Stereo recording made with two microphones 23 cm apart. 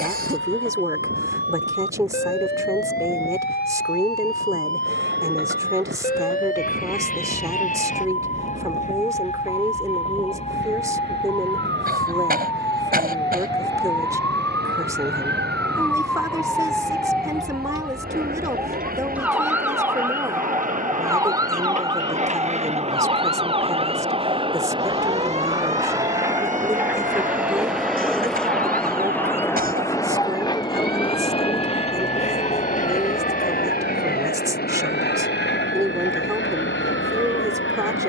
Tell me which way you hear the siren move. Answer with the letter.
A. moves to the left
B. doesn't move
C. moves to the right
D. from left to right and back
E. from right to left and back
C.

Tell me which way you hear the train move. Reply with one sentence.
In this clip you hear the train go from the right side to the left.